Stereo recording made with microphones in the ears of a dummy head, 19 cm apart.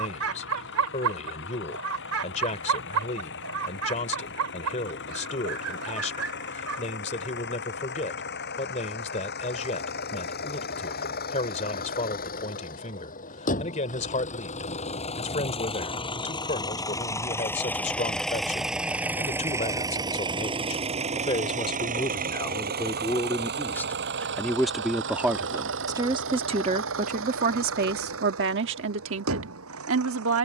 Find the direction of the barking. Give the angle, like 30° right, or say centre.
70° right.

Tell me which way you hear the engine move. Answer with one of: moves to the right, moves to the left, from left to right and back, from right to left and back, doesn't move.
moves to the right.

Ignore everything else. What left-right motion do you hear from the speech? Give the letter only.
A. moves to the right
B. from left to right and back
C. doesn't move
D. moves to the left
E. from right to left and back
A.